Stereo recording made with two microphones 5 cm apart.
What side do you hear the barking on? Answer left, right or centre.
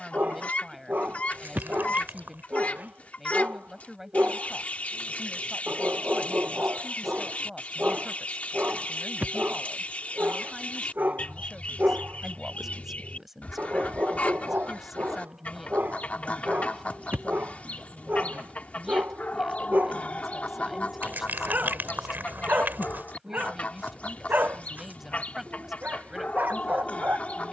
right.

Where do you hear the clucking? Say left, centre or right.
left.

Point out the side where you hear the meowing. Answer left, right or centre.
right.